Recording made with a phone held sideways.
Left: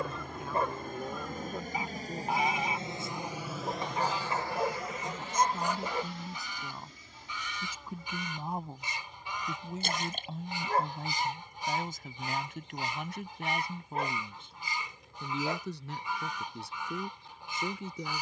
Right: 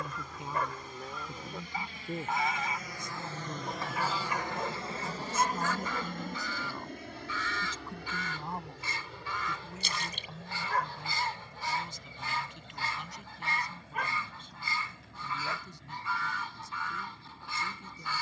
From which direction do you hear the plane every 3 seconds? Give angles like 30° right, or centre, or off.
50° left, 20° right, 60° right, 70° right, 70° right, 80° right.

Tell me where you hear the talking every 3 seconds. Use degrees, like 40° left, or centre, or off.
20° right, 10° right, 10° left, 40° left, 60° left, 70° left.